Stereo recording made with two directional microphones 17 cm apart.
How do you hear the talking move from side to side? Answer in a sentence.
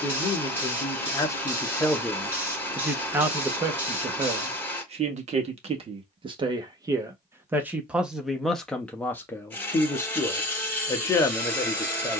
In this clip you hear the talking move from left to right and back again.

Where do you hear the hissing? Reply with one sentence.
You can hear the hissing in the centre.